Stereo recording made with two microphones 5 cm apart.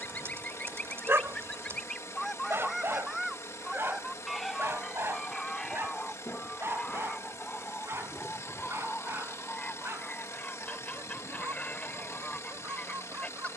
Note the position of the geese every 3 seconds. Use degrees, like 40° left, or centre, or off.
10° left, centre, 20° left, 30° left, 30° left.